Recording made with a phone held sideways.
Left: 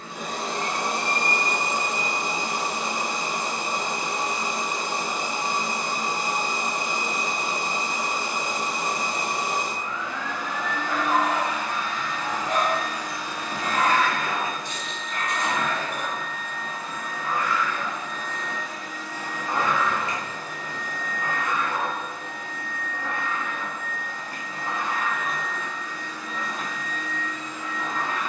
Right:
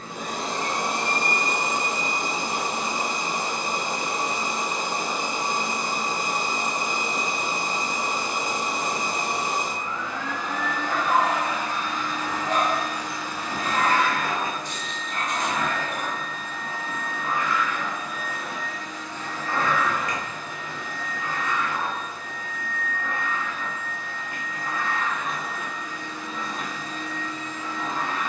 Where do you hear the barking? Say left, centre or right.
right.